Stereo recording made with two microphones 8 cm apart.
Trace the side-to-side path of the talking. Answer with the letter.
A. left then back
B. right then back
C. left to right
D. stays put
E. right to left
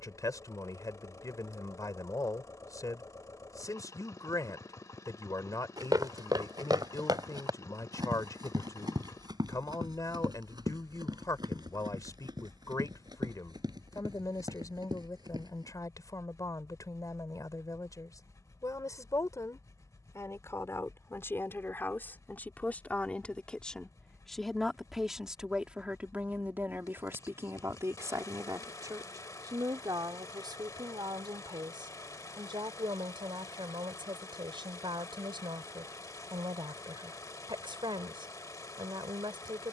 C.